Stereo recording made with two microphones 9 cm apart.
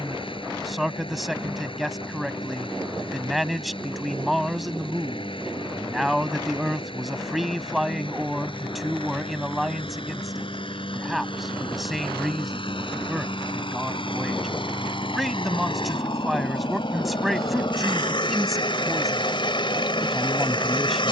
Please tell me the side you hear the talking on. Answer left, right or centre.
centre.